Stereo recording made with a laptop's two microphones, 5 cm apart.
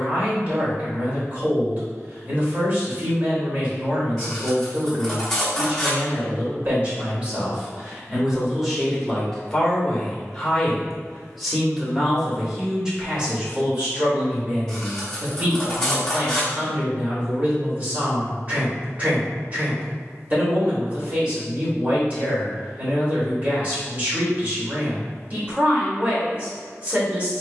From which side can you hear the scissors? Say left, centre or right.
centre.